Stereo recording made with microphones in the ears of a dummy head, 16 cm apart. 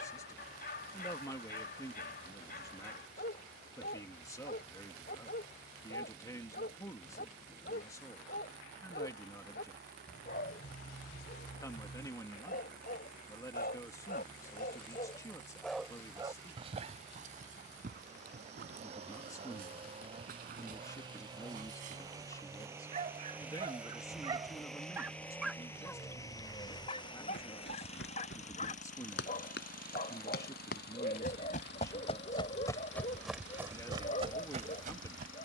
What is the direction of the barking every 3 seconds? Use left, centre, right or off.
left, left, left, left, left, right, right, right, centre, left, left, left.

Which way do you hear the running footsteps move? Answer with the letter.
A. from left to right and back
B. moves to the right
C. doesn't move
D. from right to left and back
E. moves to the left
B.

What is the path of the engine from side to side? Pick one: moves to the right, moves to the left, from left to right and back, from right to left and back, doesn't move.
moves to the left.